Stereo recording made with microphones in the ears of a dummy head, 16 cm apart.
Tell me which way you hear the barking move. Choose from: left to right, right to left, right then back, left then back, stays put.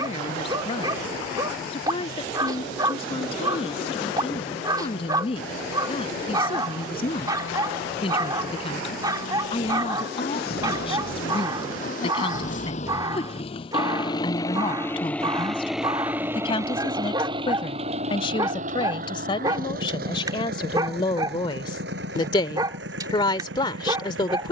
stays put.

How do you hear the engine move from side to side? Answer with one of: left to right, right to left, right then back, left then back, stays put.
left to right.